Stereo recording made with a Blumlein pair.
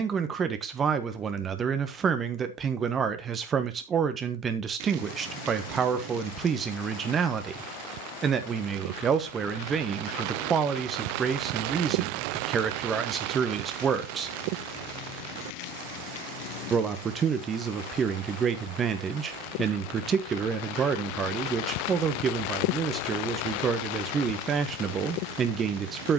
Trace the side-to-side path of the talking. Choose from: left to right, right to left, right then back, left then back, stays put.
stays put.